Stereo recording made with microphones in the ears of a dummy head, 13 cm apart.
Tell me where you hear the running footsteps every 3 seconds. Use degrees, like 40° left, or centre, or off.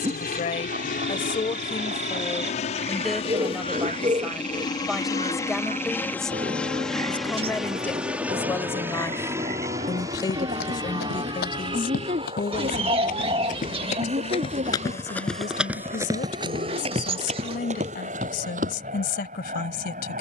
off, off, off, 80° left, 50° left, 30° right, 60° right.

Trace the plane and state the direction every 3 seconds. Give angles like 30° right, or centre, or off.
60° left, 30° left, centre, 30° right, 40° right, 50° right, 50° right.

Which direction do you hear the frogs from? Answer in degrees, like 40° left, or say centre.
50° right.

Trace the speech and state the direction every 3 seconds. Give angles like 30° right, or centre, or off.
30° left, centre, 10° left, 30° left, 50° left, 60° left, 70° left.